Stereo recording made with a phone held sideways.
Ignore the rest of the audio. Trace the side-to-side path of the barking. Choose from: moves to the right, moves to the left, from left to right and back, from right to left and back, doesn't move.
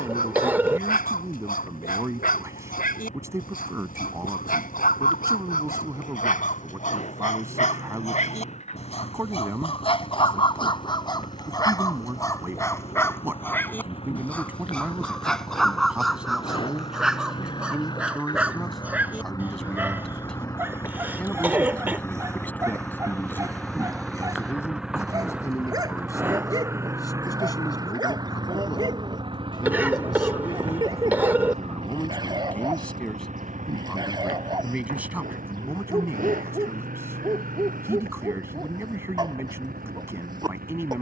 moves to the right.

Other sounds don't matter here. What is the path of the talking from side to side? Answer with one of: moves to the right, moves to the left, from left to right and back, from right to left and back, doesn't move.
from right to left and back.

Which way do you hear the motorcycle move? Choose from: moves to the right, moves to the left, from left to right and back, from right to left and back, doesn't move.
moves to the right.